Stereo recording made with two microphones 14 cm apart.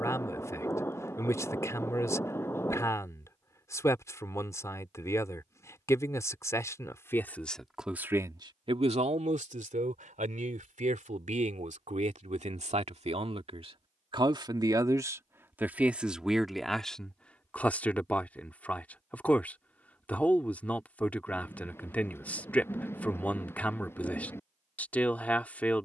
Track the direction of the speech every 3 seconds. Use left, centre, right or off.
left, left, centre, right, right, centre, centre, centre, centre.